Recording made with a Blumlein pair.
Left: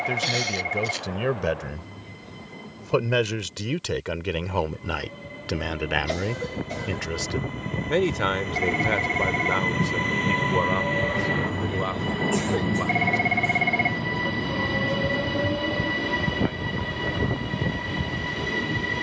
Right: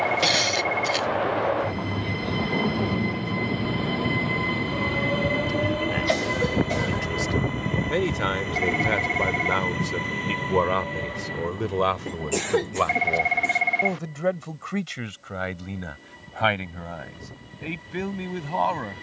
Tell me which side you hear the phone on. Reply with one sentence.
In this clip you hear the phone in the centre.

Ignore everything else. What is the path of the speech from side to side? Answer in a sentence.
You can hear the speech move to the right.